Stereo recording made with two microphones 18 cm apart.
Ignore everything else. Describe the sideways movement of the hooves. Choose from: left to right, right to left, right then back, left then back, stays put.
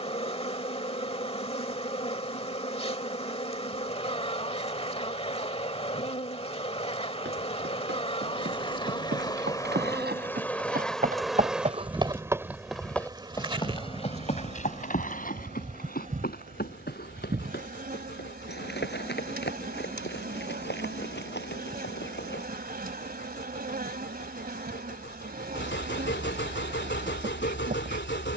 right to left.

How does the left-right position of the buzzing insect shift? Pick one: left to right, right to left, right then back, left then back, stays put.
left to right.